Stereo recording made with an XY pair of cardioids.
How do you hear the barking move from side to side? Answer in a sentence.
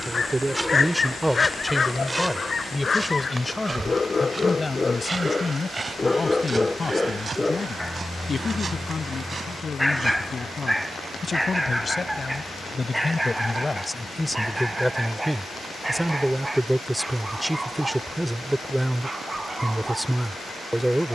You can hear the barking travel towards the right.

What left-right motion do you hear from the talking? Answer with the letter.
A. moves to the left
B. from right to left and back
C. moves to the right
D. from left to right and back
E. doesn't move
B.